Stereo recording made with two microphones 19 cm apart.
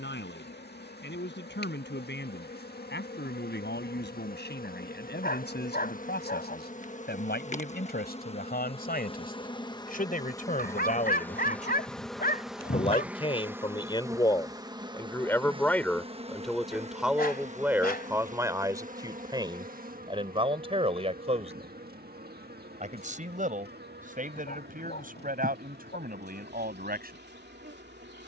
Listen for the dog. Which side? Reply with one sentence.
In this clip you hear the dog on the left.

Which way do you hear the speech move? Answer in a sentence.
You can hear the speech travel towards the right.